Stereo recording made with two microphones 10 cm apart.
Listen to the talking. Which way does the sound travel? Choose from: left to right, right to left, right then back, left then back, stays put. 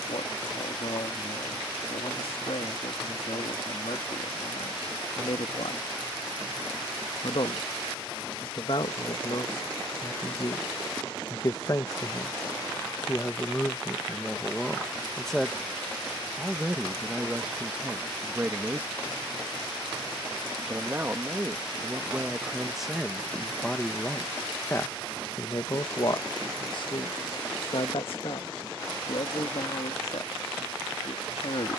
right then back.